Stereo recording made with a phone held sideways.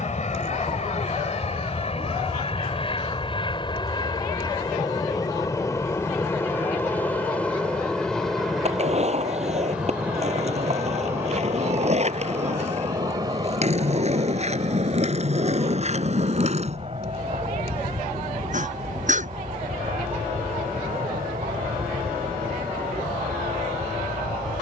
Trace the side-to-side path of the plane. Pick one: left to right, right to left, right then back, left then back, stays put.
left to right.